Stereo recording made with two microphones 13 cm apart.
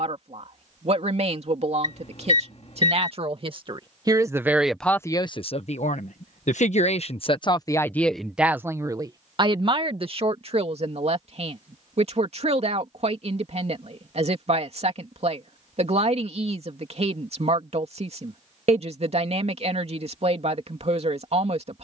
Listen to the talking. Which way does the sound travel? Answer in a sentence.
You can hear the talking move from right to left and back again.